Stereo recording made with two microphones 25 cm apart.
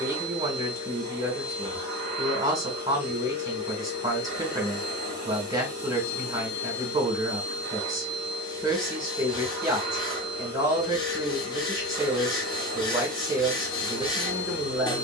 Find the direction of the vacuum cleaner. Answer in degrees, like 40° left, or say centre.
60° left.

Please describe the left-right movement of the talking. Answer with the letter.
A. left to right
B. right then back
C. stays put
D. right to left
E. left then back
C.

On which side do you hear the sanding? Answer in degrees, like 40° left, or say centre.
20° left.